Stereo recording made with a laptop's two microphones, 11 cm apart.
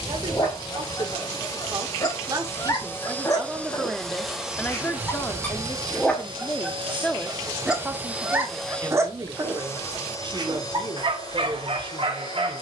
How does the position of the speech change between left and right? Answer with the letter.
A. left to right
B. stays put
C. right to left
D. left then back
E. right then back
D.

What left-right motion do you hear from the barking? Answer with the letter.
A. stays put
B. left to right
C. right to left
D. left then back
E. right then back
B.